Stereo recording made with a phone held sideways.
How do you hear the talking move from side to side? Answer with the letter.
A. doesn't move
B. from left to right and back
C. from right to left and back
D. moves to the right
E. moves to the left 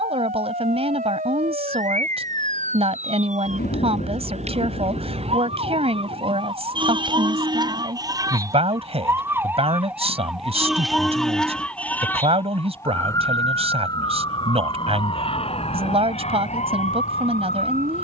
A.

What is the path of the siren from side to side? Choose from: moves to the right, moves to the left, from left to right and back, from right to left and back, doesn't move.
moves to the left.